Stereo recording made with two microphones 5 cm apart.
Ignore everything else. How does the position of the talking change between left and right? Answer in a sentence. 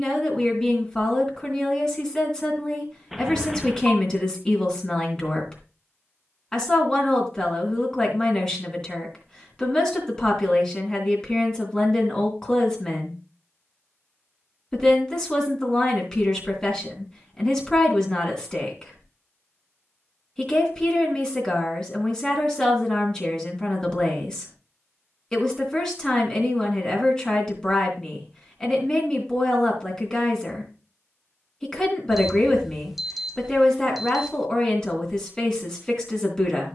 In this clip you hear the talking stay put.